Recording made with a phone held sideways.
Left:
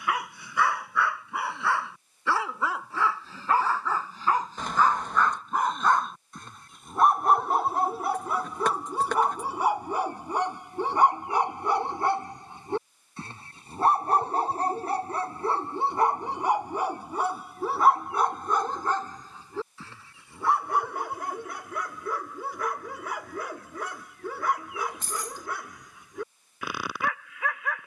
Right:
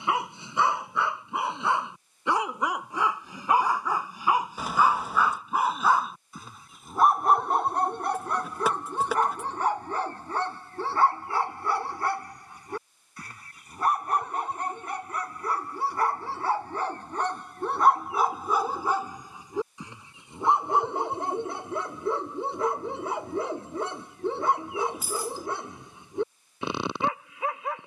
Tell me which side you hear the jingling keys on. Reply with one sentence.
You can hear the jingling keys in the centre.